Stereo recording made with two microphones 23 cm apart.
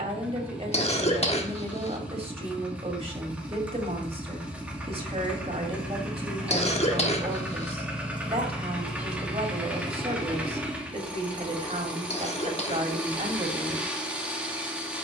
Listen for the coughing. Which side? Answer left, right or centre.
left.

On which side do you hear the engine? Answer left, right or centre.
centre.